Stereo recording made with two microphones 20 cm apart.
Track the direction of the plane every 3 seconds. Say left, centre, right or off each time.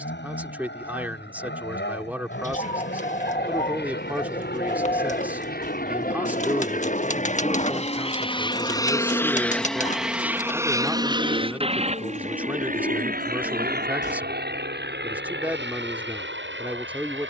left, left, left, centre, right, right.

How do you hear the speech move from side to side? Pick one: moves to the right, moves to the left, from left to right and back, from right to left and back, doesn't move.
doesn't move.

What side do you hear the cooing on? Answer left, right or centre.
left.